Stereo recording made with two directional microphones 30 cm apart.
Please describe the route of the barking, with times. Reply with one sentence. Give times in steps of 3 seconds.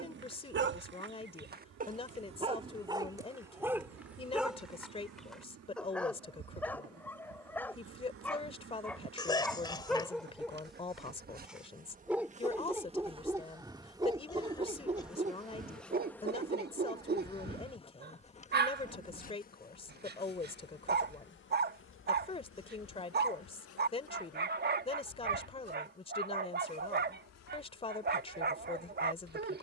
In this clip you hear the barking on the right from 0 s, in the centre from 3 s and on the right from 15 s.